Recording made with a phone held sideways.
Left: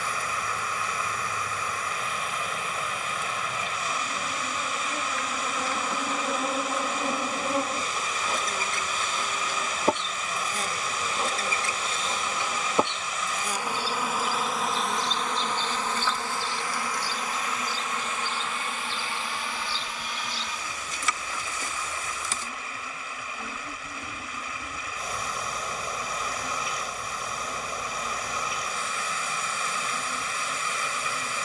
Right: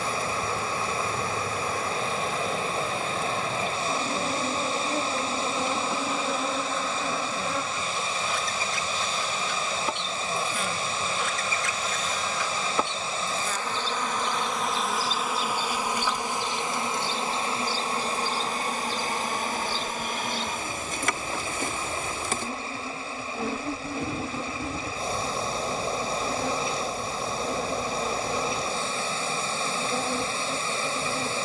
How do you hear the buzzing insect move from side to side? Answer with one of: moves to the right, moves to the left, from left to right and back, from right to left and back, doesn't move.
from right to left and back.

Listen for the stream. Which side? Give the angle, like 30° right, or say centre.
30° right.